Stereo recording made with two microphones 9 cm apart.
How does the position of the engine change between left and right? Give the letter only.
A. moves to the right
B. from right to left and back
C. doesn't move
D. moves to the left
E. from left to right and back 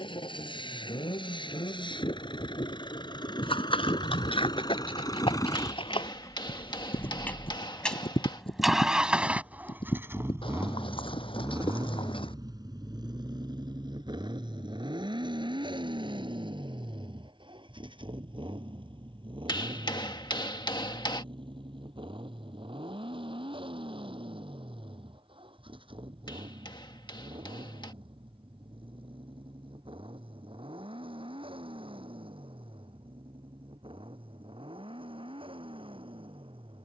A.